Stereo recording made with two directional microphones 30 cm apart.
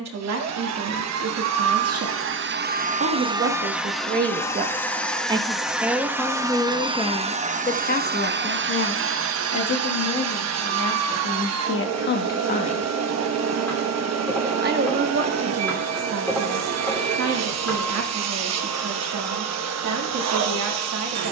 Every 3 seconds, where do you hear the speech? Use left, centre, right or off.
right, right, left, left, centre, right, right.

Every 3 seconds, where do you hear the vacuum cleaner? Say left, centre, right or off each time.
right, centre, right, right, right, right, right.